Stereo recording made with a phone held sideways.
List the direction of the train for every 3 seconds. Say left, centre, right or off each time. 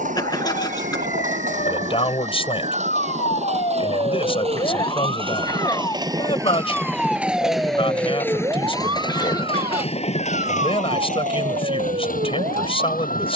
right, right, centre, left, left.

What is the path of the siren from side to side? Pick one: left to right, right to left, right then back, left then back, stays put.
left to right.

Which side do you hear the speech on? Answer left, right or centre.
left.